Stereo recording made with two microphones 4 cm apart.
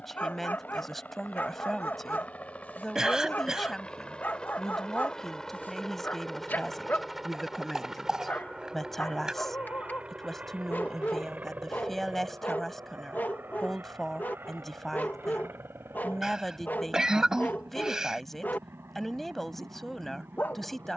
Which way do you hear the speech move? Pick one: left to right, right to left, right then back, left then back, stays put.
stays put.